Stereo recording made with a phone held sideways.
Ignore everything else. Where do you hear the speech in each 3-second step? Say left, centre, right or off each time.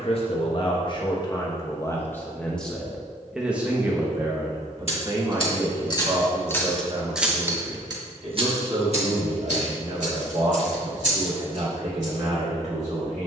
left, right, right, right, right.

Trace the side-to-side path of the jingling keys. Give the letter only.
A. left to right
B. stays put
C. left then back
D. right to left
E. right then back
A.